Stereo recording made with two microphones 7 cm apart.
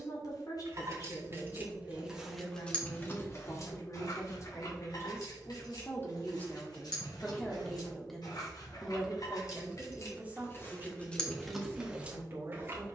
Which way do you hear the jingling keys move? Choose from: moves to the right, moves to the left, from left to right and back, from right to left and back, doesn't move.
from right to left and back.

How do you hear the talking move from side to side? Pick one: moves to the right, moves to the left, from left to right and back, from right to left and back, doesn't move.
moves to the right.